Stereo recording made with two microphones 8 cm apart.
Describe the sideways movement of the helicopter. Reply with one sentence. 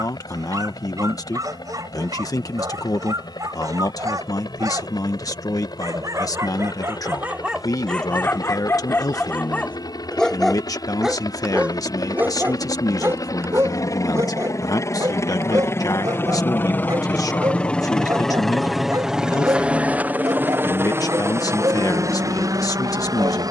You can hear the helicopter go from the left side to the right.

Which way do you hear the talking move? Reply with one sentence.
In this clip you hear the talking stay in one place.